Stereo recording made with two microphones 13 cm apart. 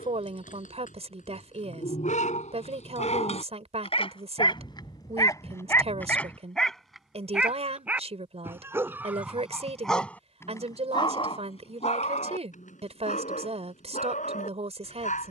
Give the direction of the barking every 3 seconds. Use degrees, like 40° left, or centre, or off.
70° left, 40° left, 10° right, 20° left, 70° left.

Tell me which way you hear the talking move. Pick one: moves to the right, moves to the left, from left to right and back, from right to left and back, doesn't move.
doesn't move.